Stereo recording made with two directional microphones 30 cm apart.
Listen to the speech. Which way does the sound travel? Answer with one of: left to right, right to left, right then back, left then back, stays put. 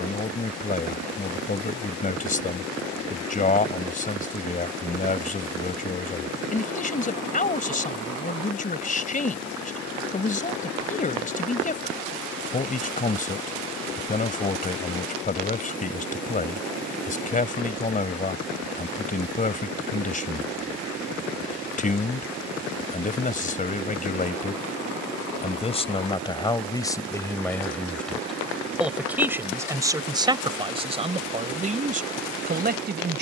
left to right.